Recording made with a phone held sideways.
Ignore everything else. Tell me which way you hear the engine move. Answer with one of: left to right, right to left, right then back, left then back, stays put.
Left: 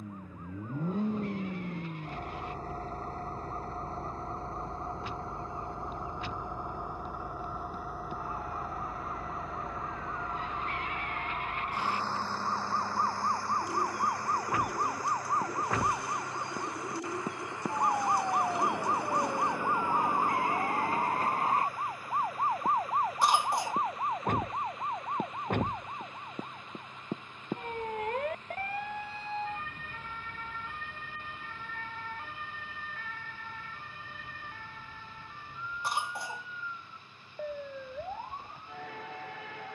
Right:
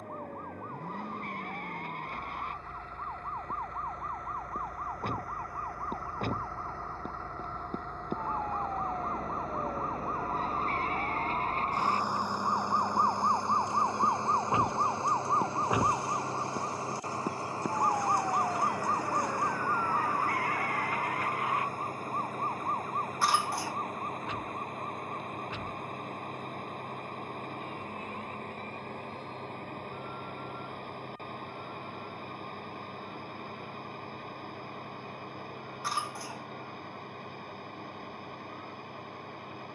left to right.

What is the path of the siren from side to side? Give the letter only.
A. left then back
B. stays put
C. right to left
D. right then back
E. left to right
C.